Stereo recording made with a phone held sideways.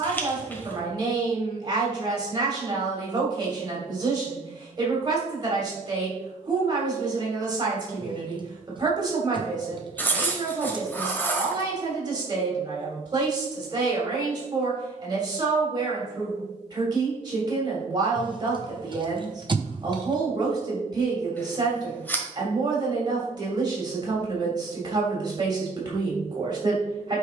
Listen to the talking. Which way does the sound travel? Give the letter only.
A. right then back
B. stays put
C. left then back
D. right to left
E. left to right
B.